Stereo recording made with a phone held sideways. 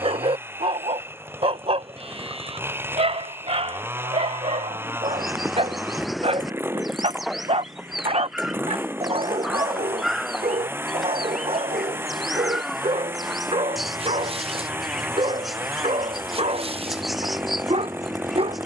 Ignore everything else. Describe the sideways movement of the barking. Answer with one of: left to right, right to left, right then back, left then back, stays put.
stays put.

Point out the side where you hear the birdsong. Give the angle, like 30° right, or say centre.
centre.